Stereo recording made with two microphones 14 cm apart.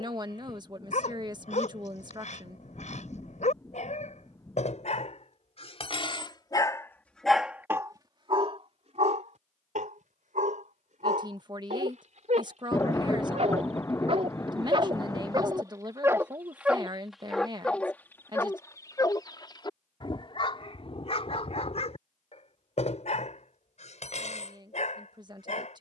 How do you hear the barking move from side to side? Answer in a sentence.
You can hear the barking go right and come back.